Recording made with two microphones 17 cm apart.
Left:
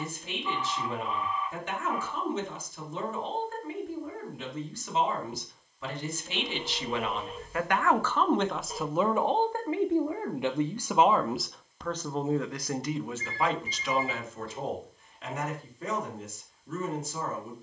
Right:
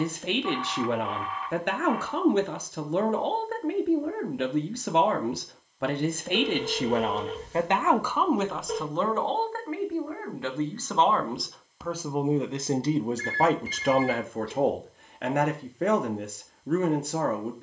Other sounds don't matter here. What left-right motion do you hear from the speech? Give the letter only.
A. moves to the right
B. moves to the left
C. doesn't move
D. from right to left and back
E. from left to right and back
D.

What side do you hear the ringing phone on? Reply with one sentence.
In this clip you hear the ringing phone on the right.